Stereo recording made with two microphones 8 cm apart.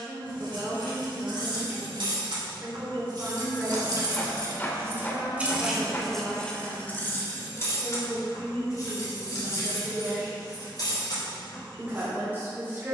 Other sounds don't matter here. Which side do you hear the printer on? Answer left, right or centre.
left.